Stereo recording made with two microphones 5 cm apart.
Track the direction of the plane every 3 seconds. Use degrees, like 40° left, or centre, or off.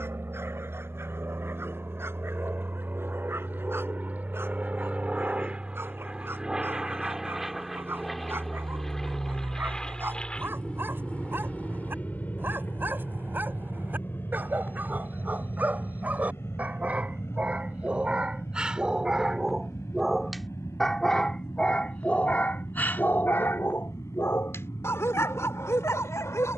50° right, 30° right, centre, 20° left, 40° left, 50° left, 60° left, 60° left, 70° left.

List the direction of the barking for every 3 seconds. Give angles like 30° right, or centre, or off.
50° right, 50° right, 50° right, 50° right, 40° right, 30° right, 10° right, 30° left, 70° left.